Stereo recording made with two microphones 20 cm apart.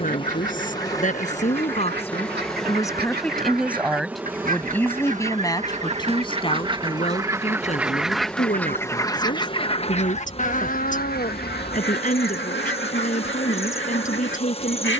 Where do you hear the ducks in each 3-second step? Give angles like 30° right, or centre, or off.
60° right, 40° right, 10° right, 40° left, 70° left.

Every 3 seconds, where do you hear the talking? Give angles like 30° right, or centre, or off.
30° left, 10° left, 30° left, 40° left, 40° left.